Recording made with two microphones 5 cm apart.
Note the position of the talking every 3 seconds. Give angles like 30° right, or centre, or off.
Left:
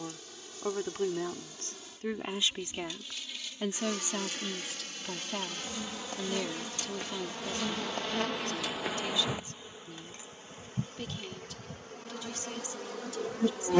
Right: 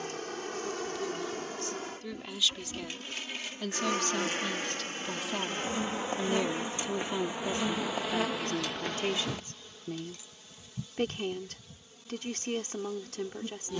30° left, 10° left, 20° right, 40° right, 40° right.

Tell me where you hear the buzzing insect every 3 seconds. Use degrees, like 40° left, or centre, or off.
50° right, 40° right, 10° right, 30° left, 60° left.